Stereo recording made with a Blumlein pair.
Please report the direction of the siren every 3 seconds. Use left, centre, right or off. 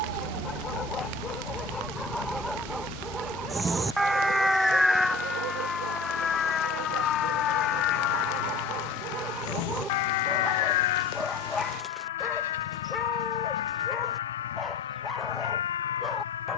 right, centre, left, left, left, left.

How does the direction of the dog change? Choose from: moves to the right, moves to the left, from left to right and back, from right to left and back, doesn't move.
from left to right and back.